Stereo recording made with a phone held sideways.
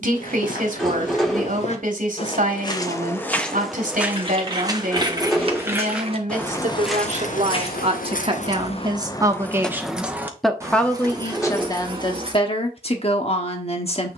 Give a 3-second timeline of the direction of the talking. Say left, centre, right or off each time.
right, right, right, centre, left.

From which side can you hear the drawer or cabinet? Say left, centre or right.
centre.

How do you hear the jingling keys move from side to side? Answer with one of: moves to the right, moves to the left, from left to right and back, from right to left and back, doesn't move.
from right to left and back.